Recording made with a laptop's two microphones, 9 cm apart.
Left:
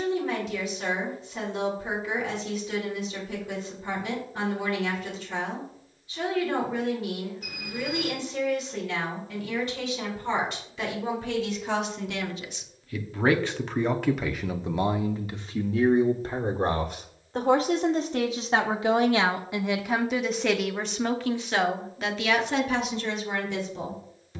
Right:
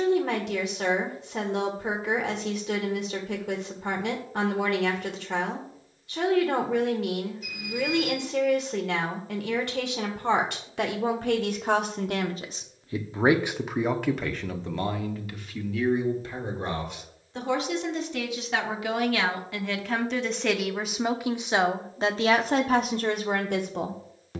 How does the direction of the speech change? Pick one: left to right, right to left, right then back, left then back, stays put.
left then back.